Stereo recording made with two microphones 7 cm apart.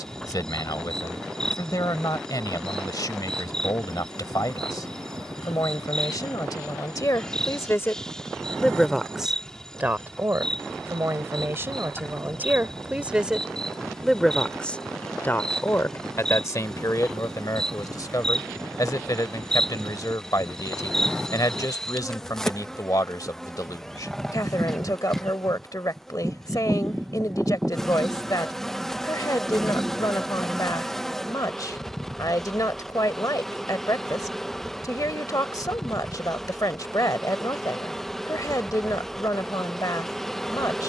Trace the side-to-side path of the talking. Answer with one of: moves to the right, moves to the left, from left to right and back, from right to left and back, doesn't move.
from left to right and back.